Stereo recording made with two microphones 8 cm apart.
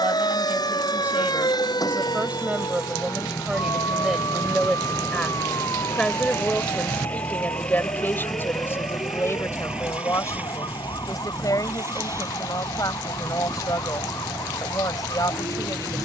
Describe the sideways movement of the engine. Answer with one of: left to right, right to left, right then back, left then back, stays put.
left to right.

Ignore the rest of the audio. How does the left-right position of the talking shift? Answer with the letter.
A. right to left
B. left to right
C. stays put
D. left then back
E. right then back
A.